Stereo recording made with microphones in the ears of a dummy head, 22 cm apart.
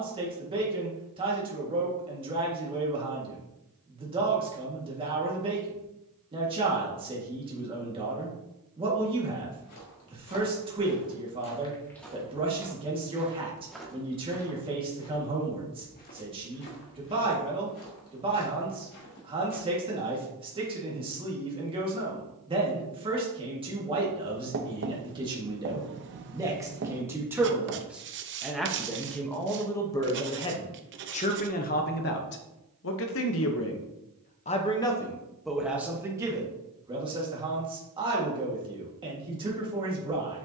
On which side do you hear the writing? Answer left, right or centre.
right.